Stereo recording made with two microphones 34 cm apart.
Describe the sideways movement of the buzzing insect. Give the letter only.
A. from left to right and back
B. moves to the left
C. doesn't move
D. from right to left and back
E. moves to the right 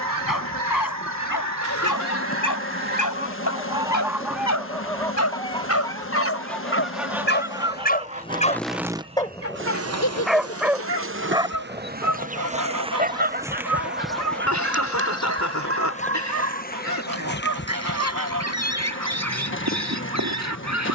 A.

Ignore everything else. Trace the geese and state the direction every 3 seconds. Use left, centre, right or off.
right, centre, centre, right, right, right, right.